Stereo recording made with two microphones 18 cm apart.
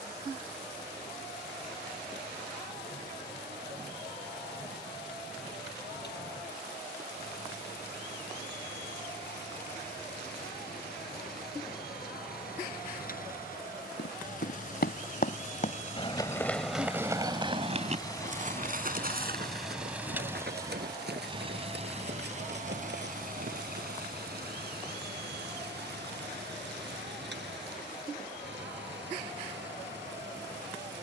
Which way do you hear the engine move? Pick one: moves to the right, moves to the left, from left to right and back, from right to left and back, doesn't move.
moves to the right.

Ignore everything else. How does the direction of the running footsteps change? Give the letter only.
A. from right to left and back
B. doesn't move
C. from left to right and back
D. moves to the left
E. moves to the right
E.